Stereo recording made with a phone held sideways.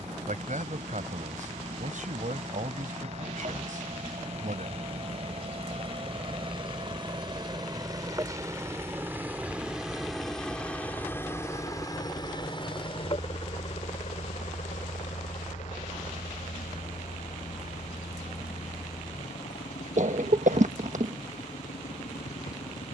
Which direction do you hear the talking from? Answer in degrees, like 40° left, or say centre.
70° right.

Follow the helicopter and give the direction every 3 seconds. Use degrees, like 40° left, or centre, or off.
60° right, 50° right, 30° right, 10° left, 40° left, 60° left, 70° left, 80° left.